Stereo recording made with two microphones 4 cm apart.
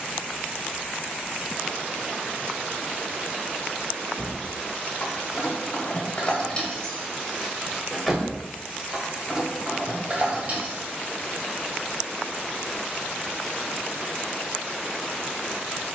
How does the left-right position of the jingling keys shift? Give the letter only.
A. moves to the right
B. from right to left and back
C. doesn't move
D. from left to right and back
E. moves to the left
A.